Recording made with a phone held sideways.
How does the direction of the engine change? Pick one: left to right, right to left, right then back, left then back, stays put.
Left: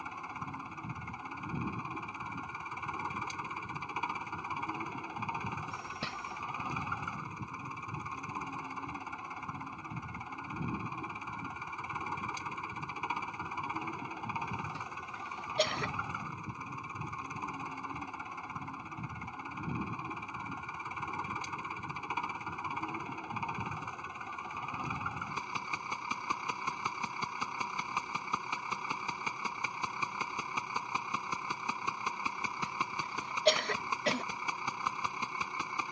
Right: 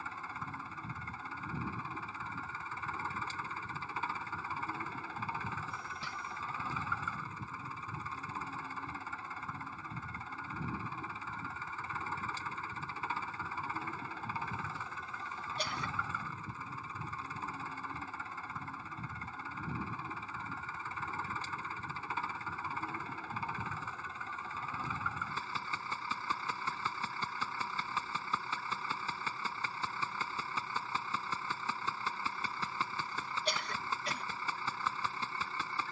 stays put.